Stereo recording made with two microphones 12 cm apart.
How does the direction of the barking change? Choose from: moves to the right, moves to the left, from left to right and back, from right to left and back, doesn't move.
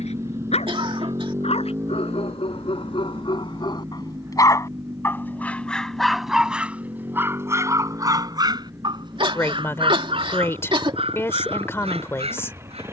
moves to the right.